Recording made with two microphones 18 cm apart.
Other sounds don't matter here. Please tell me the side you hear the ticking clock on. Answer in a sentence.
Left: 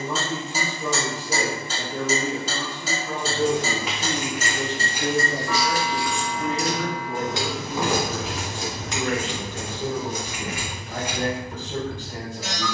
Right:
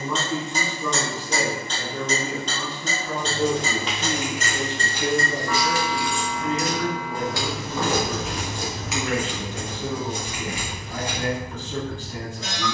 In this clip you hear the ticking clock in the centre.